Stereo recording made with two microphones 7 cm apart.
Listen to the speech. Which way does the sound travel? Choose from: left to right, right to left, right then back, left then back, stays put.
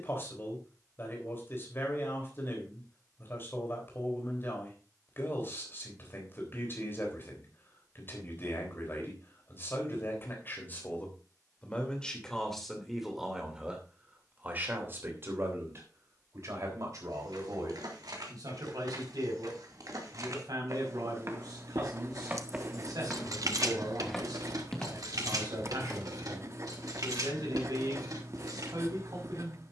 left to right.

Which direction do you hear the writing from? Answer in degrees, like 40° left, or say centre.
40° right.